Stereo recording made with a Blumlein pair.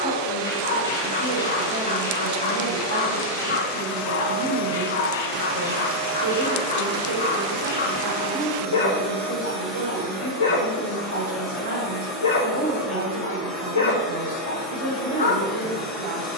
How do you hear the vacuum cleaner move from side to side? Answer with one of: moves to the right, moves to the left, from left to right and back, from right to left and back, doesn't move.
moves to the left.